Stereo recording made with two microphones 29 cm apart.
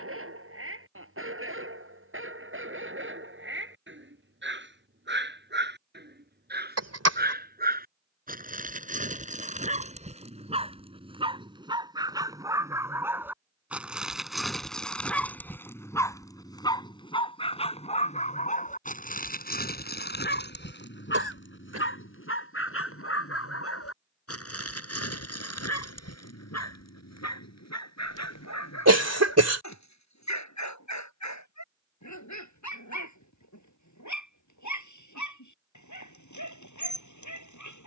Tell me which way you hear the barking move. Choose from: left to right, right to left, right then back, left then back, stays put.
right to left.